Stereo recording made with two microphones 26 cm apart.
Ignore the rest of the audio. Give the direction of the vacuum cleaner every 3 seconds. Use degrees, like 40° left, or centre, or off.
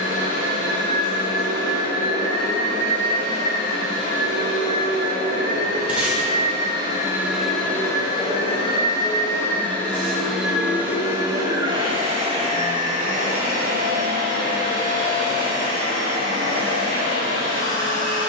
60° right, 50° right, centre, centre, 30° right, 50° right.